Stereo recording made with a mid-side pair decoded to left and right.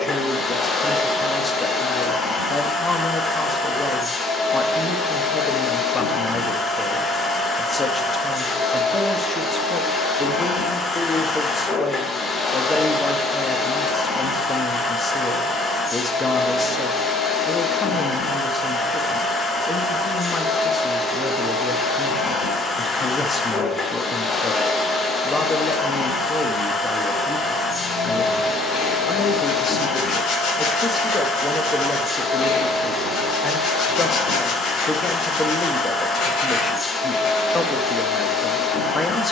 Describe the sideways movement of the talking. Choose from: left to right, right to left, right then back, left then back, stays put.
stays put.